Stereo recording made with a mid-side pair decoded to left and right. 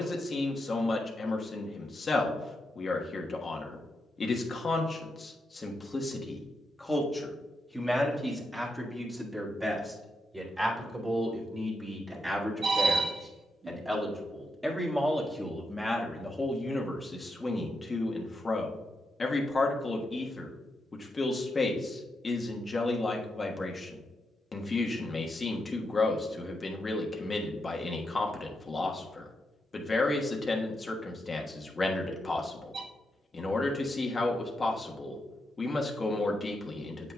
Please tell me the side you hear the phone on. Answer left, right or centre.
right.